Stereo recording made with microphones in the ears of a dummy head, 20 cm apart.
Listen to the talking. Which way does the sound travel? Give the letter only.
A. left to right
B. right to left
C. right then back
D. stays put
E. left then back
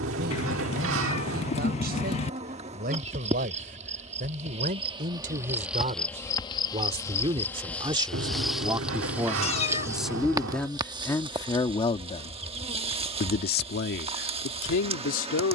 B.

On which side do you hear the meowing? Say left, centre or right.
left.